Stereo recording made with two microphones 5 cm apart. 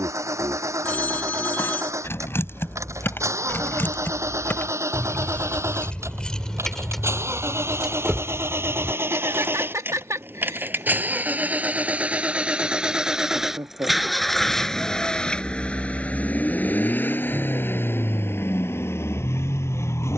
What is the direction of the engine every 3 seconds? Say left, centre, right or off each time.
right, right, right, right, centre, left, left.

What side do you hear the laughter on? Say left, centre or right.
right.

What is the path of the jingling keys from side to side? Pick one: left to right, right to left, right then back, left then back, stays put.
left to right.